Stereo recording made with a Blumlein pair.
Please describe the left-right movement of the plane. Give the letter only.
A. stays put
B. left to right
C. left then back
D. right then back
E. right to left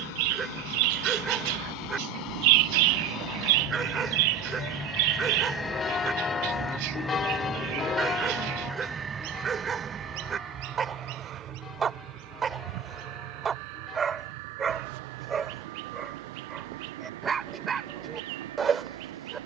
B.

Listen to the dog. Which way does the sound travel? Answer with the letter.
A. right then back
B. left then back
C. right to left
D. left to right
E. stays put
E.